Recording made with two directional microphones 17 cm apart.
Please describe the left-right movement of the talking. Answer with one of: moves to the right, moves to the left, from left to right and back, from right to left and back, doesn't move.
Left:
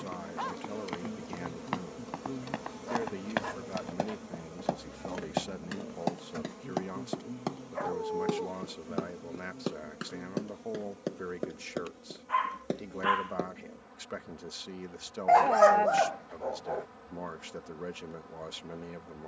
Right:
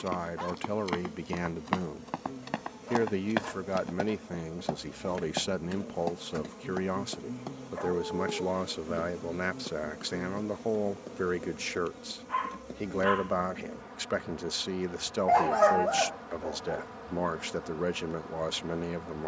doesn't move.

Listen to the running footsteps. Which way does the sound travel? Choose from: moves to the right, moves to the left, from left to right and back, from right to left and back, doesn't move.
moves to the left.